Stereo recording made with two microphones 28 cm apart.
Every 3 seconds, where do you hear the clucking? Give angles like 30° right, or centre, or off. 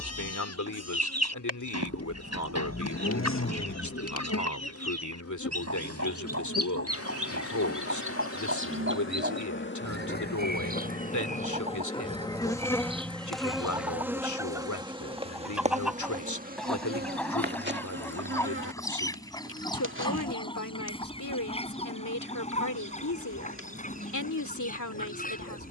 60° right, 60° right, 50° right, 30° right, 20° right, centre, 10° left, 20° left, 30° left.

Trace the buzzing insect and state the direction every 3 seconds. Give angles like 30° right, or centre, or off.
50° left, 50° left, 50° left, 30° left, centre, 30° right, 40° right, 40° right, 40° right.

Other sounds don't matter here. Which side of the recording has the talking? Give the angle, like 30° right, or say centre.
80° left.